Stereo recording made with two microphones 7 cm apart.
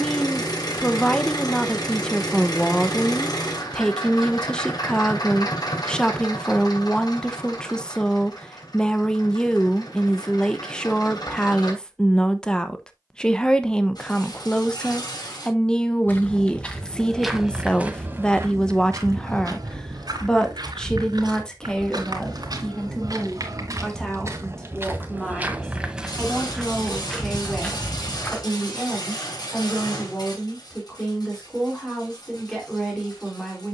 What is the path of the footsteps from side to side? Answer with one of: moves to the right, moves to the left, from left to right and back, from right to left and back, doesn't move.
from left to right and back.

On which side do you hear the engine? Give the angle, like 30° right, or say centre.
70° left.